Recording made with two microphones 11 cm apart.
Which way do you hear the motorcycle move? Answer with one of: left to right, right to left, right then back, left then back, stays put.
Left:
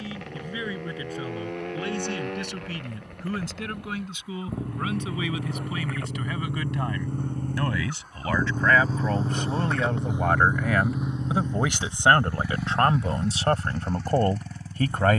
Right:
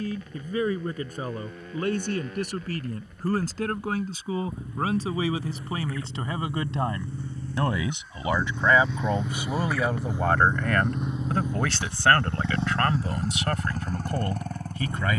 left to right.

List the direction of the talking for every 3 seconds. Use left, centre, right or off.
right, right, right, centre, left.